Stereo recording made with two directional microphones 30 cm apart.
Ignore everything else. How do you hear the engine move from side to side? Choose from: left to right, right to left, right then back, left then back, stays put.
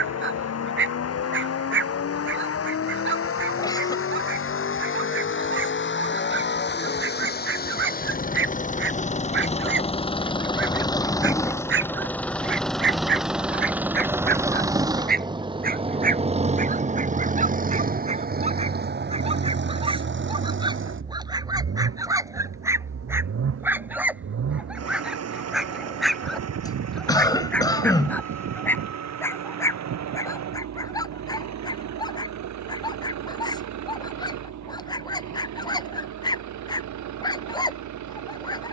left to right.